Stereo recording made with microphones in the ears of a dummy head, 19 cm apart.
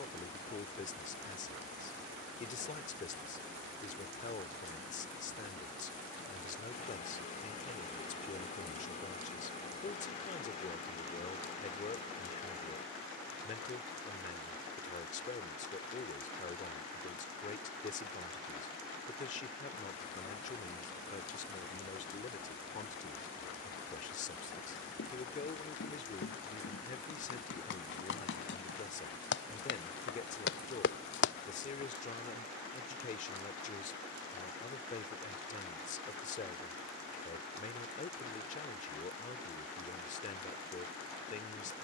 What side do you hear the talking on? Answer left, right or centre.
left.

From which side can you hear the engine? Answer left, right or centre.
left.